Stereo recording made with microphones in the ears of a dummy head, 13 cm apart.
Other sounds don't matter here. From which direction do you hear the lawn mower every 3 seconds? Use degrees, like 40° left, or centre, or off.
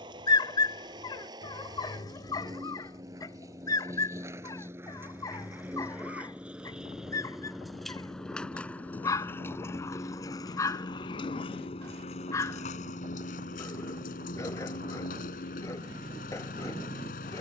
30° right, 20° right, centre, 30° left, 50° left, 60° left.